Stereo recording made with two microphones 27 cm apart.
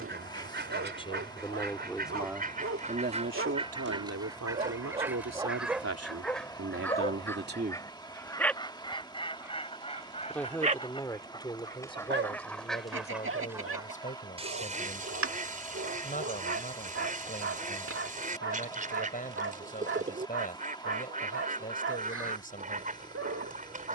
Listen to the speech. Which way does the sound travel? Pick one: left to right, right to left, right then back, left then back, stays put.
right then back.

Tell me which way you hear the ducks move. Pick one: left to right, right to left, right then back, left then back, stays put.
left then back.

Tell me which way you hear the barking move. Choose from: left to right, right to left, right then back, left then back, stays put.
left then back.